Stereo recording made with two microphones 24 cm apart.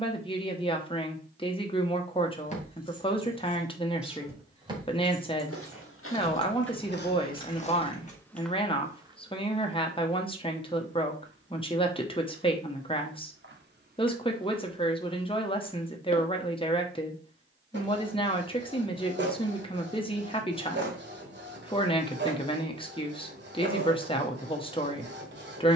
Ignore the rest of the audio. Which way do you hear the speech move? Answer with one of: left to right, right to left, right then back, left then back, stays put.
stays put.